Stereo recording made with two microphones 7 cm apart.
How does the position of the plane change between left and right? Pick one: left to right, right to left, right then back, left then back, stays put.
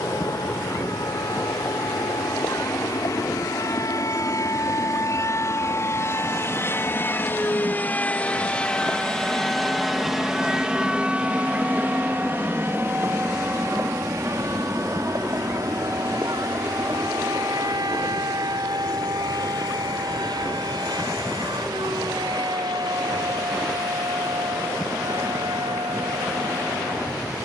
left to right.